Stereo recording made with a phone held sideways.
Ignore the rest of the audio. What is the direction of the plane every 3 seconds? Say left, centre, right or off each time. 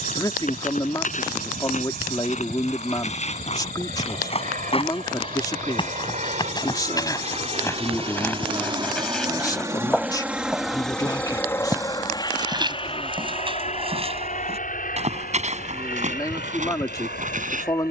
right, right, right, centre, left, left.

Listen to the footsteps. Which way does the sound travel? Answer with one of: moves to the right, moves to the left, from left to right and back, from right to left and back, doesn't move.
moves to the right.